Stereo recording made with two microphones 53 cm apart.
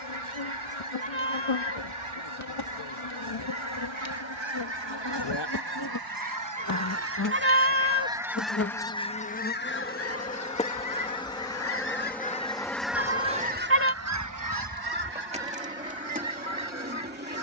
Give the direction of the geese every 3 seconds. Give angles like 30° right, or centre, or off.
70° right, 60° right, 20° right, 30° left, 20° right, 60° right.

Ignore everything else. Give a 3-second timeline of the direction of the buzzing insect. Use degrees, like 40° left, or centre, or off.
70° left, 50° left, 30° left, 10° left, centre, 20° right.